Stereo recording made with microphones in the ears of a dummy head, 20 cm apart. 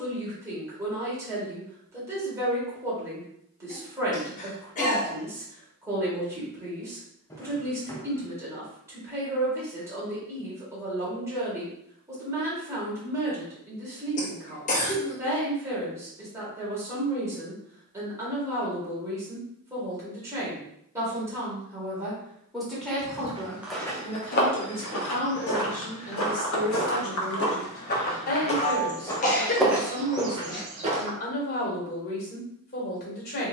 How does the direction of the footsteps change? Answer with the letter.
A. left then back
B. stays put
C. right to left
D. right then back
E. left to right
A.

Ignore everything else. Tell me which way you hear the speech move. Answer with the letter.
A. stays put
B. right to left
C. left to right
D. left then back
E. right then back
B.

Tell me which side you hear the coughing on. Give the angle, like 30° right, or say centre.
30° left.